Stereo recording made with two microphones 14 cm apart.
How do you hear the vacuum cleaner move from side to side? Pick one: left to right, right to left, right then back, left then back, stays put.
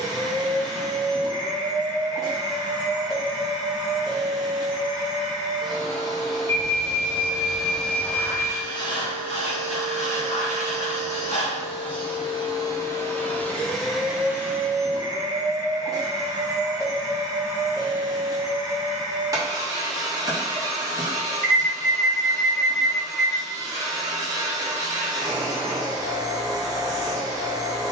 left then back.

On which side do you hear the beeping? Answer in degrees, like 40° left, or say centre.
20° left.